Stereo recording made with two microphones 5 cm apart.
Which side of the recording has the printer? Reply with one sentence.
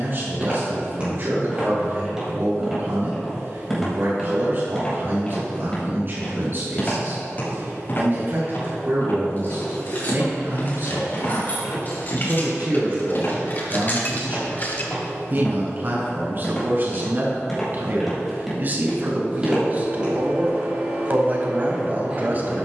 You can hear the printer on the right.